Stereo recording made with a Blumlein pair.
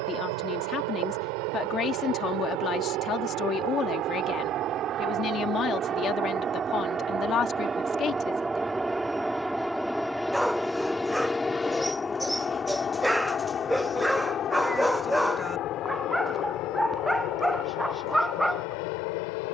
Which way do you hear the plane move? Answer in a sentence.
In this clip you hear the plane move to the left.